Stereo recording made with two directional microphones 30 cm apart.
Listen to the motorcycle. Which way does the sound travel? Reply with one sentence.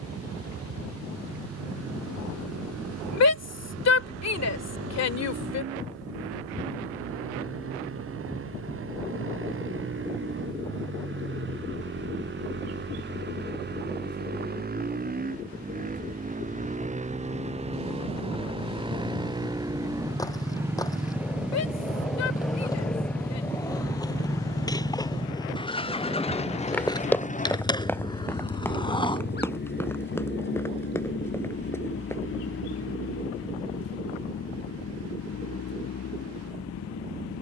In this clip you hear the motorcycle travel towards the left.